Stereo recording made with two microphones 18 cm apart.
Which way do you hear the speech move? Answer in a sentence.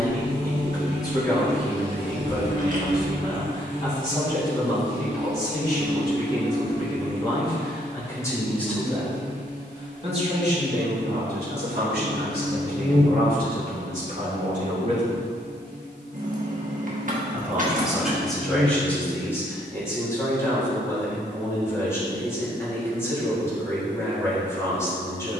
You can hear the speech move from left to right and back again.